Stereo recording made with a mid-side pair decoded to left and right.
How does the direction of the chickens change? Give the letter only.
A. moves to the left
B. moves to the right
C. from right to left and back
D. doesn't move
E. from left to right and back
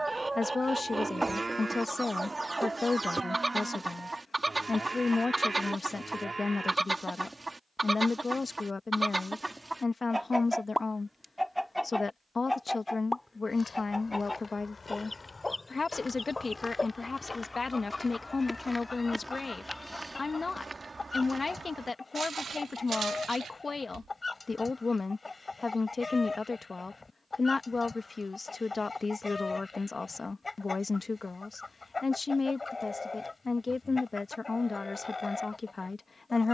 A.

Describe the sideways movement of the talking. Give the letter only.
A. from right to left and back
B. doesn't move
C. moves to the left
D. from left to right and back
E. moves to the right
B.